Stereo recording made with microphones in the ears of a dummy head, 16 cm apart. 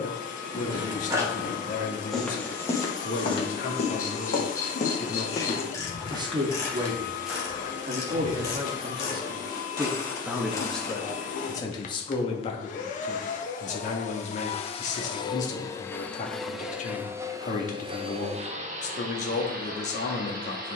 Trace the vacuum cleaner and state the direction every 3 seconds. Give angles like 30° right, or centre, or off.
50° left, 50° left, 50° left, 50° left, 40° left, centre, 50° right.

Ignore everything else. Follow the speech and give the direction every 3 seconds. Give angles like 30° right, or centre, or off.
50° left, 40° left, 30° right, centre, 40° left, 40° left, 40° left.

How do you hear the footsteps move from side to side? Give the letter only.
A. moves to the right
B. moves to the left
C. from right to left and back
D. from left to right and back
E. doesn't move
C.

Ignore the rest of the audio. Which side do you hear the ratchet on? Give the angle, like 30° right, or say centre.
20° left.